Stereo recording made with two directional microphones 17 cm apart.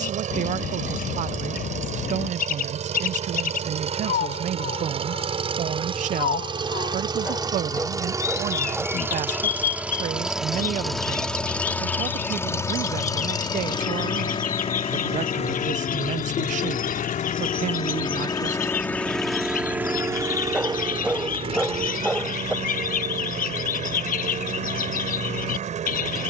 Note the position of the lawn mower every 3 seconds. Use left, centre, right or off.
right, right, right, centre, left, left, centre, right, right.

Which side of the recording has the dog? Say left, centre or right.
centre.